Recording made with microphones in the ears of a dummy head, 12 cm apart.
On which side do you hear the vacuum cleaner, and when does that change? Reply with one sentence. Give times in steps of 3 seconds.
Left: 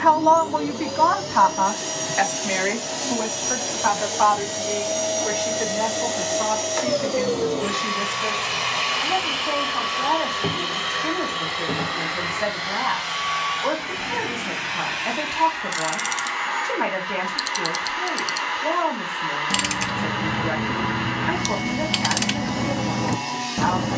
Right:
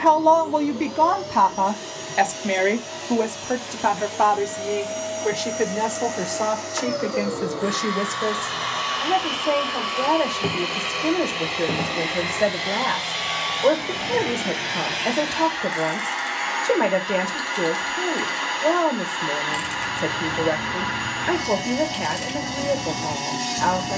You can hear the vacuum cleaner on the left from 0 s, in the centre from 9 s and on the right from 12 s.